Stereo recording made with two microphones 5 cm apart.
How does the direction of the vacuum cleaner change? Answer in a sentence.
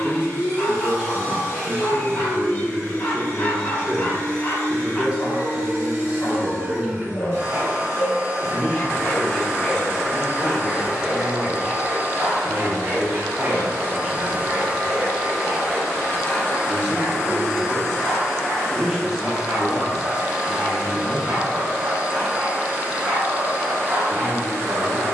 You can hear the vacuum cleaner move from right to left and back again.